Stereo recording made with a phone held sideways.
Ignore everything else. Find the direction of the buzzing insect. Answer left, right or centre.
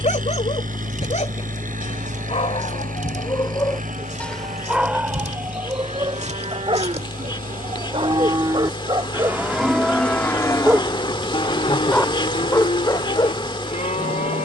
left.